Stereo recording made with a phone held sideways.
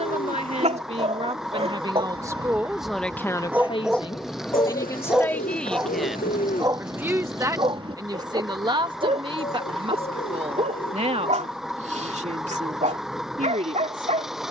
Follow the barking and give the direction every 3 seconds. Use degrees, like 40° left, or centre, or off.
40° right, 10° right, 30° right, 50° right, 50° right.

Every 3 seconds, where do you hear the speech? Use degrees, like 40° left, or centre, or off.
30° right, 20° left, 20° right, 40° right, 50° right.